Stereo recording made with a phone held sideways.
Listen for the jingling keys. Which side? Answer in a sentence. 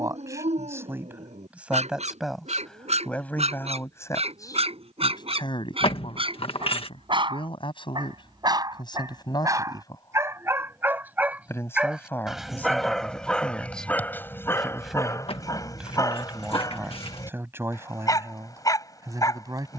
In this clip you hear the jingling keys on the left.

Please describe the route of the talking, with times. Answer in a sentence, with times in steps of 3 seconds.
You can hear the talking in the centre from 0 s, on the left from 3 s, in the centre from 12 s and on the right from 18 s.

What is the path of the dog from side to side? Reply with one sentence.
In this clip you hear the dog go from the right side to the left.